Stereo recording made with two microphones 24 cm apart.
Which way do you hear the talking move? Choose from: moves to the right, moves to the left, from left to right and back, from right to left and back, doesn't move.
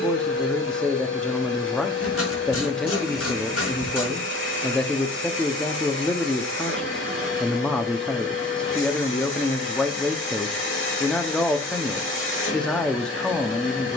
doesn't move.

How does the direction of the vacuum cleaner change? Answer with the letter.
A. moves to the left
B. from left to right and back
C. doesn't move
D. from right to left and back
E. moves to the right
C.